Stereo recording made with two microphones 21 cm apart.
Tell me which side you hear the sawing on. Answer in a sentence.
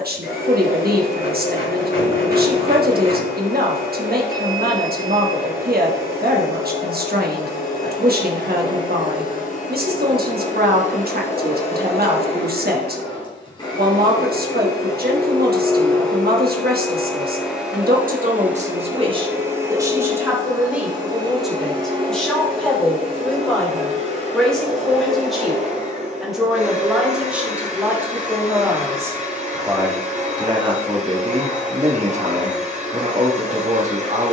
You can hear the sawing on the left.